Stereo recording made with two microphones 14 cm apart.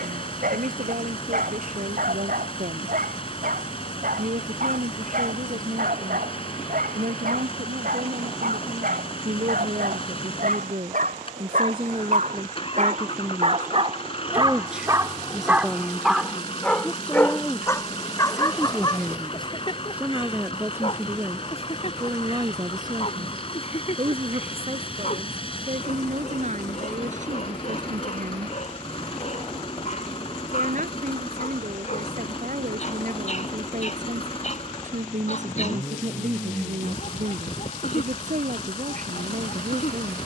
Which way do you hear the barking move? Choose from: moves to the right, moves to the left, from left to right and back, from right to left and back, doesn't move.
moves to the left.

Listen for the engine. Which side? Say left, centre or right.
left.